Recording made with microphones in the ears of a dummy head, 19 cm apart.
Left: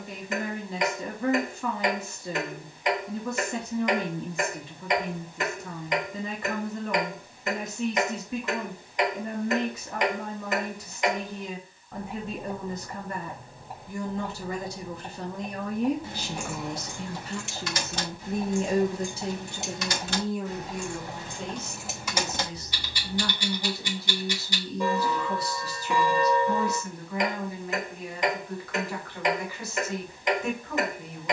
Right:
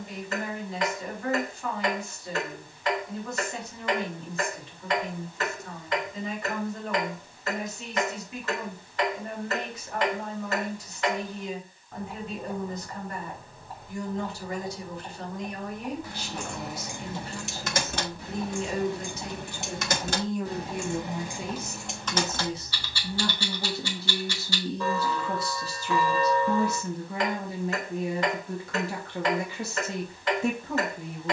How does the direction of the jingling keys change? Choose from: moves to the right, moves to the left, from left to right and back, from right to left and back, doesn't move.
from left to right and back.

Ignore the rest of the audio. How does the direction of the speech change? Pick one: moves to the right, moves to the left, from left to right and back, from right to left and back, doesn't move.
moves to the right.